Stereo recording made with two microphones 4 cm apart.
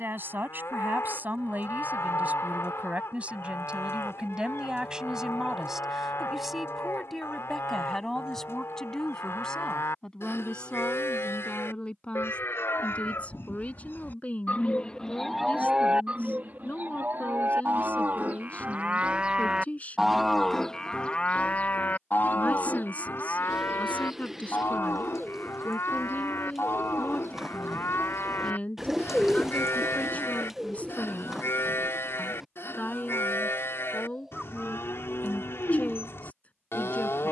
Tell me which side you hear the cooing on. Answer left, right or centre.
centre.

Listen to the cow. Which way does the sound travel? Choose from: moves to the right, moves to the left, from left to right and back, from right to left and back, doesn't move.
from left to right and back.